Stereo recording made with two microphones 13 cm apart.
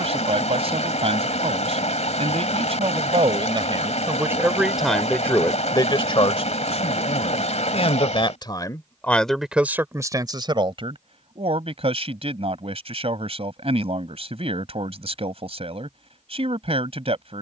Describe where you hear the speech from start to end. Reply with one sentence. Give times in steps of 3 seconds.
In this clip you hear the speech on the right from 0 s, in the centre from 3 s, on the left from 6 s and on the right from 9 s.